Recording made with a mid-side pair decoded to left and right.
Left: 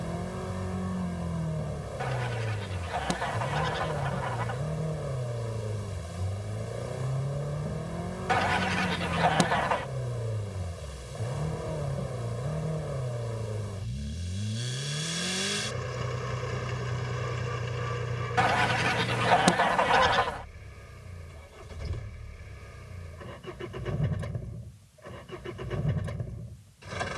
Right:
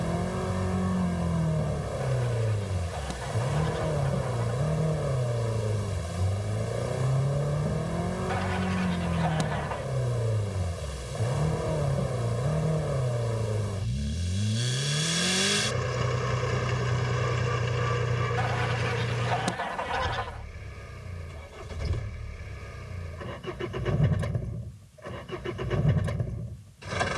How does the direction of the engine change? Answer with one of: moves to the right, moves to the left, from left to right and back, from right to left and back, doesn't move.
doesn't move.